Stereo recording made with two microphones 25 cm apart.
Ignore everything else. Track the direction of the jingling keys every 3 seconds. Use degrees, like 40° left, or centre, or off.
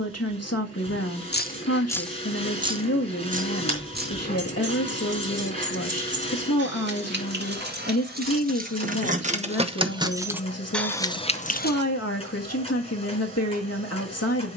20° left, 40° right, 40° right, centre, off.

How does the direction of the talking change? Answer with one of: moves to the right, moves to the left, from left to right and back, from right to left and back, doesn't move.
doesn't move.